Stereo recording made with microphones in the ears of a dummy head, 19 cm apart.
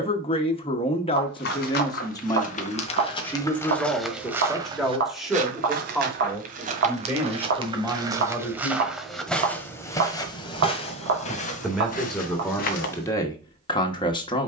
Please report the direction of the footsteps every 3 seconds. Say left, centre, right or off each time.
left, centre, right, left, left.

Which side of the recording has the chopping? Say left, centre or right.
right.